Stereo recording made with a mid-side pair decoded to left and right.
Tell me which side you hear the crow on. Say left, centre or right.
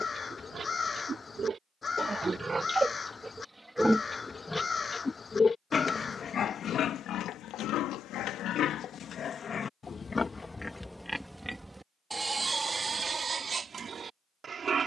left.